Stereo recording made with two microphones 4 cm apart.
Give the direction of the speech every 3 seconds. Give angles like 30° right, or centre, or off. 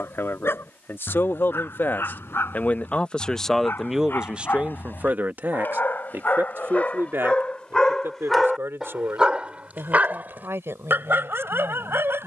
50° left, 20° right, 70° right, 80° right.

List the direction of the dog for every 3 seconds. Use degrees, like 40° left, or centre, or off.
60° left, 50° left, 20° left, 50° right.